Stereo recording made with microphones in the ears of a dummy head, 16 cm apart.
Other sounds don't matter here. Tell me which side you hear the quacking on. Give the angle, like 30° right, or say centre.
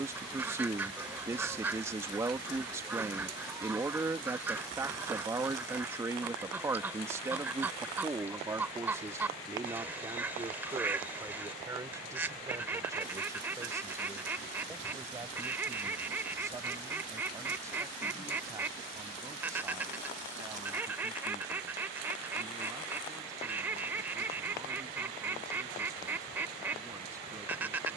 10° right.